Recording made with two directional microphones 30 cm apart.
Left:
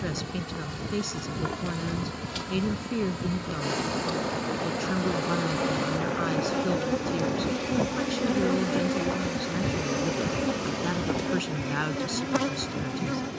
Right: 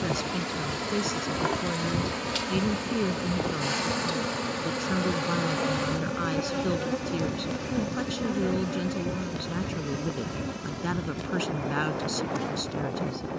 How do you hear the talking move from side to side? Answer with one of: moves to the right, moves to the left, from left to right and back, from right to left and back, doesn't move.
doesn't move.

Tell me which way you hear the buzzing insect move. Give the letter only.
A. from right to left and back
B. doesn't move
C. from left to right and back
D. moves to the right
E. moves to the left
E.